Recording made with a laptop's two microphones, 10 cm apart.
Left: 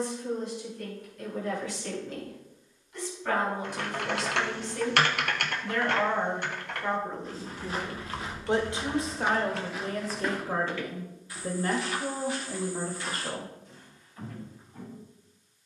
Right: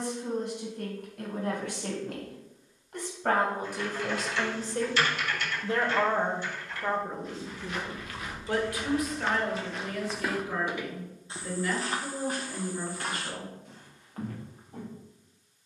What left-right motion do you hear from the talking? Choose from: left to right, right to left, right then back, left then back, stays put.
right to left.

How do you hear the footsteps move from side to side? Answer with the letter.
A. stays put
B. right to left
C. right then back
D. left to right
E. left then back
D.